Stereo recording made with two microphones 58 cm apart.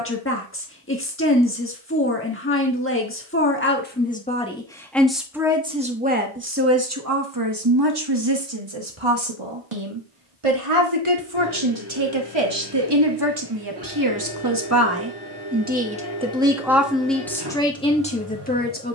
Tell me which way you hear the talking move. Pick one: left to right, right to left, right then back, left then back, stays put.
right then back.